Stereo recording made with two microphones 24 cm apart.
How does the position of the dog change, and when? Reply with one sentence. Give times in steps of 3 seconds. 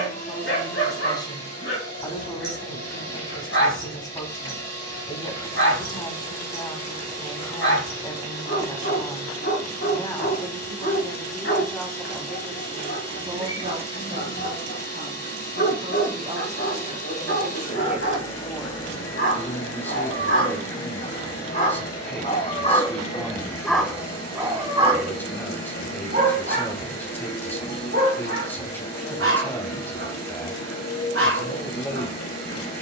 You can hear the dog on the left from 0 s and on the right from 24 s.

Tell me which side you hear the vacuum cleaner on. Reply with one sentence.
In this clip you hear the vacuum cleaner on the left.